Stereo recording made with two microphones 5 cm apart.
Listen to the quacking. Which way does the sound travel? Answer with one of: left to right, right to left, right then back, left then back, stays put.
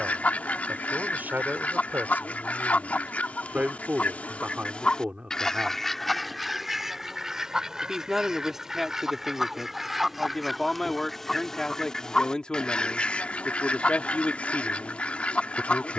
right then back.